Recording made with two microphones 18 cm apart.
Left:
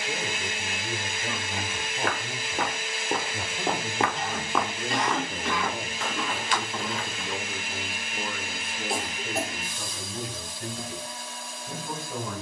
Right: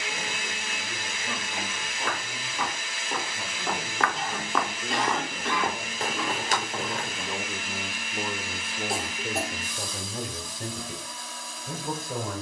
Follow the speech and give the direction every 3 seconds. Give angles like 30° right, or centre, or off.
70° left, 40° left, 10° right, 50° right.